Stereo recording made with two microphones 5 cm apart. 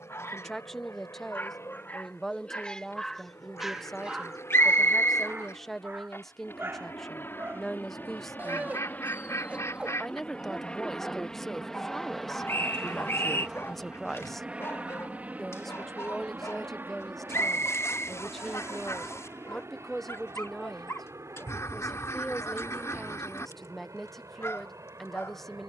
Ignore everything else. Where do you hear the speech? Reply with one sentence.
In this clip you hear the speech in the centre.